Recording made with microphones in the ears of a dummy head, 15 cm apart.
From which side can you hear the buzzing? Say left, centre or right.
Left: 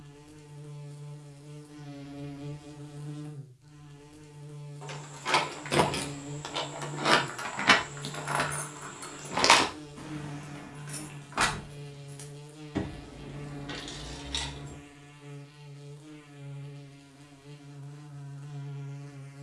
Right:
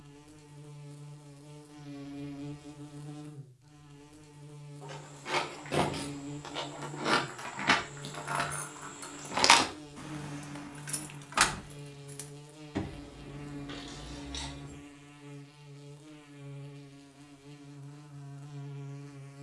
centre.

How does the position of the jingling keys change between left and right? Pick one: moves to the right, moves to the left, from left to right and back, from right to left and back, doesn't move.
from left to right and back.